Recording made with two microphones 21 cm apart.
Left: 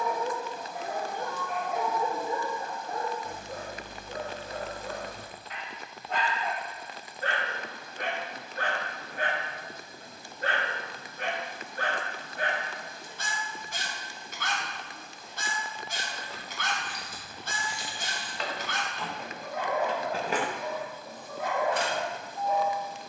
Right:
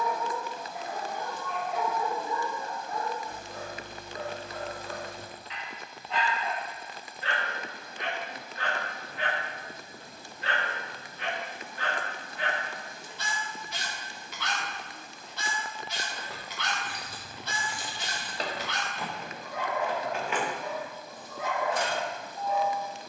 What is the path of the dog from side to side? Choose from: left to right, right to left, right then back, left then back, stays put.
stays put.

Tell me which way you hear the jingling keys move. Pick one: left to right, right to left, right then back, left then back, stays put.
right to left.